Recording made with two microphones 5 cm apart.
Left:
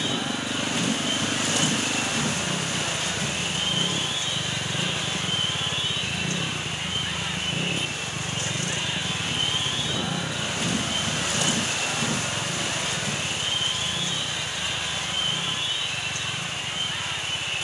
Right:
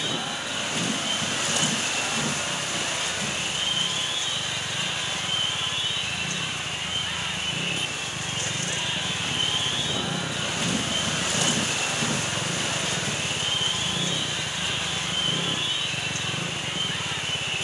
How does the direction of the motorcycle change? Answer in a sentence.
You can hear the motorcycle travel towards the right.